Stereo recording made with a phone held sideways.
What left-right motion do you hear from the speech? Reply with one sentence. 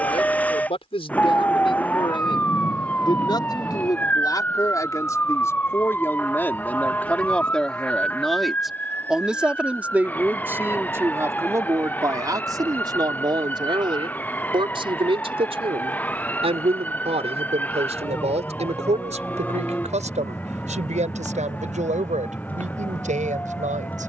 You can hear the speech move from left to right.